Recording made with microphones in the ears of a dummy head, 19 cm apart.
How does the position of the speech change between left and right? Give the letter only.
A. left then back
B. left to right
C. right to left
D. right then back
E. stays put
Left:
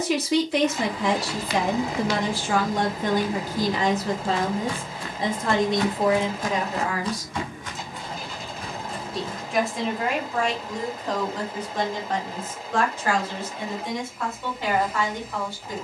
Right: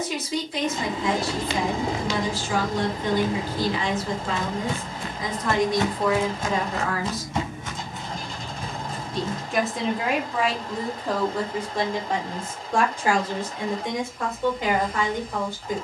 B.